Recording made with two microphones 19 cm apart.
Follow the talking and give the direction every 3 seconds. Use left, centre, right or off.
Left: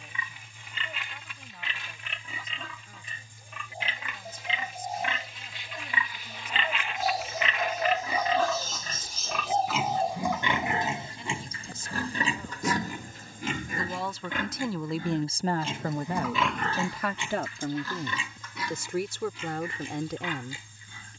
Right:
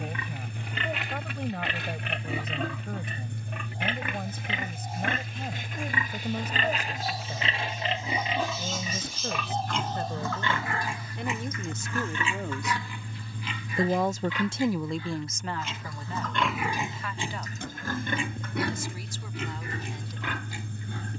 right, right, right, right, right, left, left.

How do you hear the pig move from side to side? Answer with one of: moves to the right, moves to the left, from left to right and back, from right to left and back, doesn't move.
from right to left and back.